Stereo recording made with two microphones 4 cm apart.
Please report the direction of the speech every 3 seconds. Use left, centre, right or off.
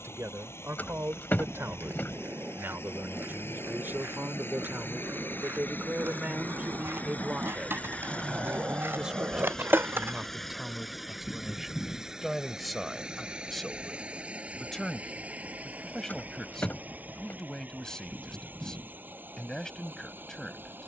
right, right, right, centre, centre, centre, centre.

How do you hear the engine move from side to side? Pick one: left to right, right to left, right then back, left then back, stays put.
left to right.